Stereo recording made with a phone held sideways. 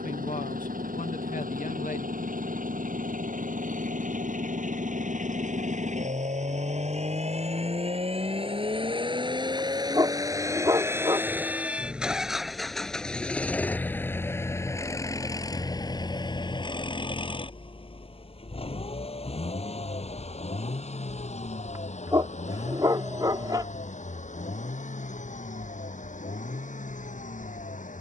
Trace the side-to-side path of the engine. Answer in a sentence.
In this clip you hear the engine travel towards the left.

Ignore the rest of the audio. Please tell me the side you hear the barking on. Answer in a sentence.
In this clip you hear the barking on the right.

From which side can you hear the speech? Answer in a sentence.
You can hear the speech on the left.